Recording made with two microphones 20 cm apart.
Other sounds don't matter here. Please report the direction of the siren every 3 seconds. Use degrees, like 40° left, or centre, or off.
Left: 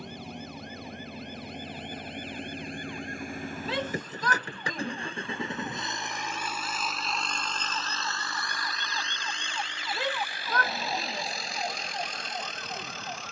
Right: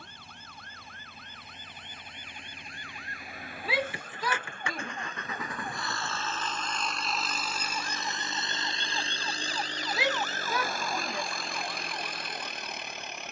60° right, 50° right, 30° right, 20° left, 60° left.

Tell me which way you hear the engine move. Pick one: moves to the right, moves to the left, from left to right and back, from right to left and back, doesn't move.
moves to the right.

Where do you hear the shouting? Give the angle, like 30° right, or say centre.
10° right.